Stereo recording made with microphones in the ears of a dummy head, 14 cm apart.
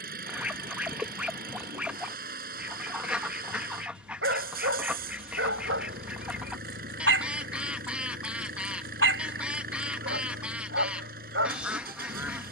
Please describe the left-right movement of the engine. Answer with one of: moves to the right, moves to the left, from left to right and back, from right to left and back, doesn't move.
doesn't move.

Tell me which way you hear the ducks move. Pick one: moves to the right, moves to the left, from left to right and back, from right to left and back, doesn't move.
doesn't move.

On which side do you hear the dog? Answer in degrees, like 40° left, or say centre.
90° right.